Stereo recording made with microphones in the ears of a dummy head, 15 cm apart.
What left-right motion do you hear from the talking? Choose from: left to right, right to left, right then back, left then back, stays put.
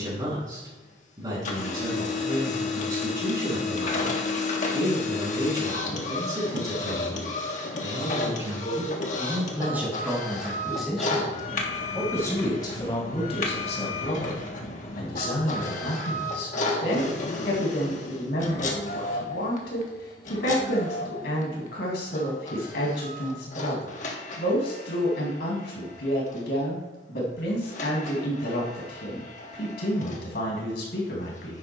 right to left.